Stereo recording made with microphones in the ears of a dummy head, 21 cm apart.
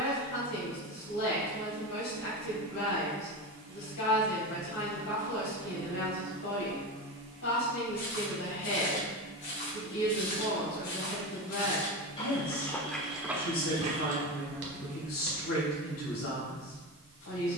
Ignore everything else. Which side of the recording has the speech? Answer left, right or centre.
left.